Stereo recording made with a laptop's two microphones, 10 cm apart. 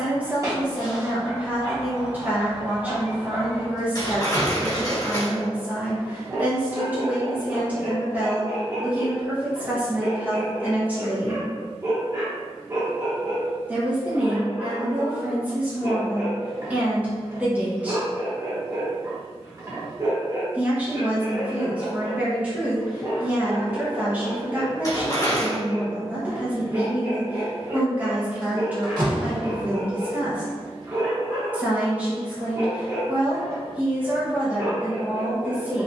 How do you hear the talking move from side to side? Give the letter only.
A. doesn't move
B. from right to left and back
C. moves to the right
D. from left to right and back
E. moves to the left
A.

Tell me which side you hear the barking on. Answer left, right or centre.
right.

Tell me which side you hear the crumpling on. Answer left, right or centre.
left.